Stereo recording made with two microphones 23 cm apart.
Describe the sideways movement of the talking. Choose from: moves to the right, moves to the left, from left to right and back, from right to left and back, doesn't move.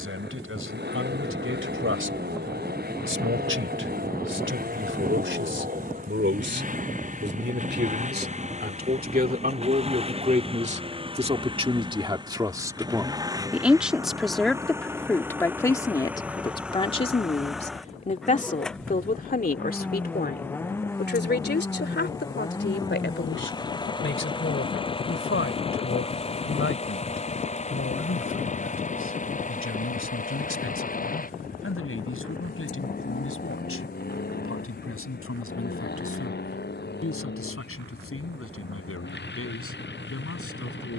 moves to the left.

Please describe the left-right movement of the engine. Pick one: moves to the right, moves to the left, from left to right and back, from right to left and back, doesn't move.
moves to the left.